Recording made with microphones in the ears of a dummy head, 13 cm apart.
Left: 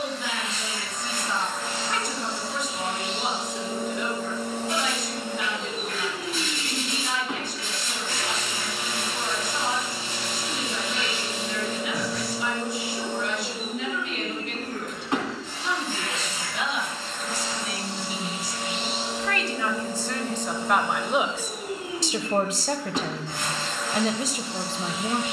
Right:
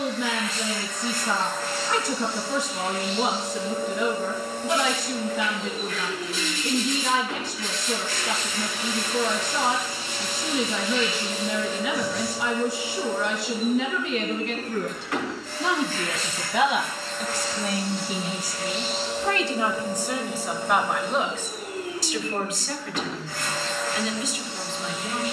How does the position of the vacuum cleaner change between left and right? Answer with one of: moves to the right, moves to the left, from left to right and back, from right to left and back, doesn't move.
doesn't move.